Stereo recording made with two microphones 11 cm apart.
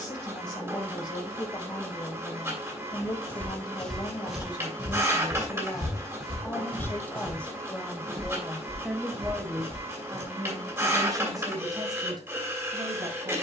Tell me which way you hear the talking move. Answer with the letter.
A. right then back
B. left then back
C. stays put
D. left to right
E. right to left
D.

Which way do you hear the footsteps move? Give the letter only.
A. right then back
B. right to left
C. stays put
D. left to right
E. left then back
D.